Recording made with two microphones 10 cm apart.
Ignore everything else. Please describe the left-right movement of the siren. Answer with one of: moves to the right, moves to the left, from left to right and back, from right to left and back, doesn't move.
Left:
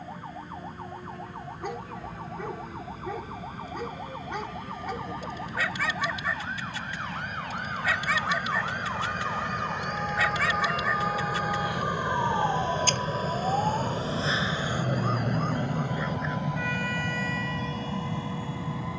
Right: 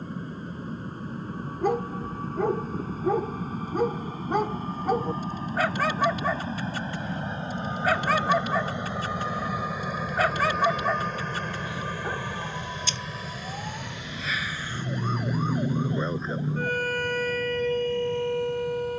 moves to the right.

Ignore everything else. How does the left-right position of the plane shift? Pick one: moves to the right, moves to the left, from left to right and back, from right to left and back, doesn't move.
moves to the left.